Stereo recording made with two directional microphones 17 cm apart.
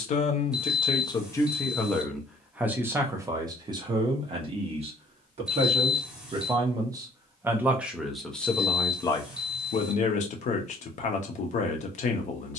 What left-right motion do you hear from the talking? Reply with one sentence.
In this clip you hear the talking go right and come back.